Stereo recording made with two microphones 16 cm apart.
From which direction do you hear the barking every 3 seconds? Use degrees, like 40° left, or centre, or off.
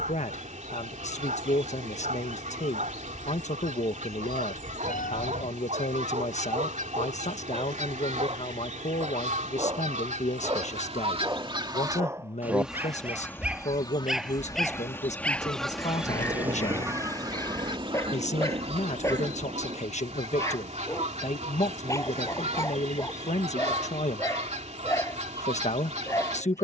50° right, 50° right, 40° right, 30° right, 10° right, 10° left, 20° left, 20° left, 20° left.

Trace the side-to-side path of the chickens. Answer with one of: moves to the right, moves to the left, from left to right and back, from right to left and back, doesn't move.
from right to left and back.